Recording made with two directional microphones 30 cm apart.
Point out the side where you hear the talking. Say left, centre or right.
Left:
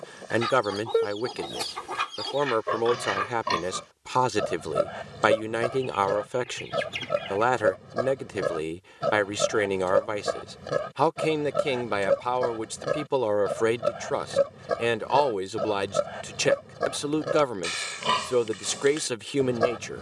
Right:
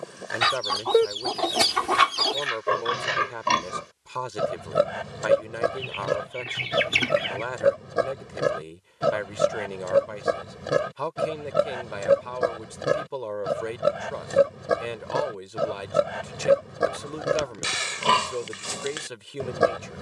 left.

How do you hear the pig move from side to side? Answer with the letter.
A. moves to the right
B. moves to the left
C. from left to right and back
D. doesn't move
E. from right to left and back
D.